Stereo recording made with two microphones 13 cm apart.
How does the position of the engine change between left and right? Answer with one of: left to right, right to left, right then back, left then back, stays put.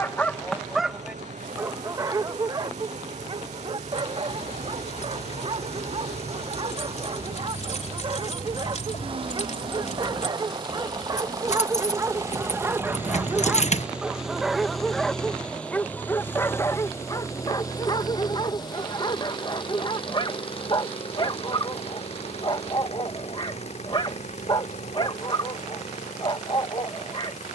right to left.